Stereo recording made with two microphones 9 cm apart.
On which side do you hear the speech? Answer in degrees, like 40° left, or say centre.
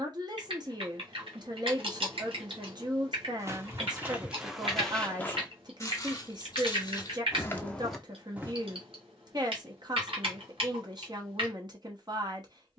50° right.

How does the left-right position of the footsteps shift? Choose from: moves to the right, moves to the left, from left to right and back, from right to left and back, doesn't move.
from right to left and back.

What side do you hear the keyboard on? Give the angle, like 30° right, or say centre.
70° right.